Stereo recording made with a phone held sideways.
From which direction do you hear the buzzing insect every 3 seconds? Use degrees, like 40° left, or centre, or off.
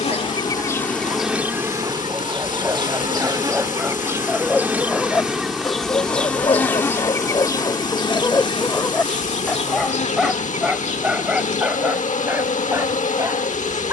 10° right, 10° right, 20° left, 50° left, 50° left.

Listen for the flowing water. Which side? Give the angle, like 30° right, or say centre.
60° left.